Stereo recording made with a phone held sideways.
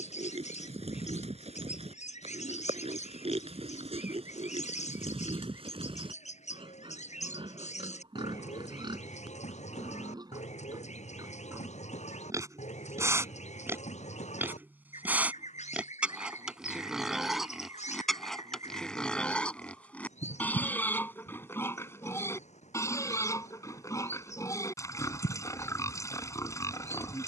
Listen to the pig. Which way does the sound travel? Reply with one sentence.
You can hear the pig move from right to left.